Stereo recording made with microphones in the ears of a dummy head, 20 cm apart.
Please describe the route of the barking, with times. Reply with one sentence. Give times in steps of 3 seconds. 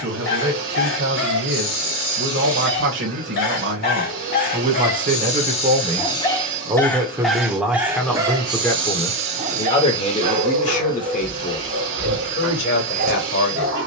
In this clip you hear the barking on the left from 0 s, in the centre from 6 s and on the right from 9 s.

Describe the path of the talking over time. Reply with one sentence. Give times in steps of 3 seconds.
In this clip you hear the talking on the right from 0 s, in the centre from 6 s and on the left from 9 s.